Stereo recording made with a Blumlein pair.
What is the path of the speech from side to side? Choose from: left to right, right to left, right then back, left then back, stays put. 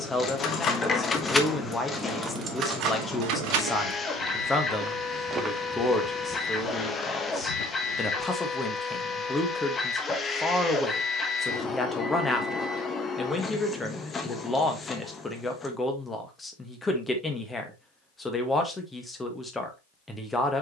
stays put.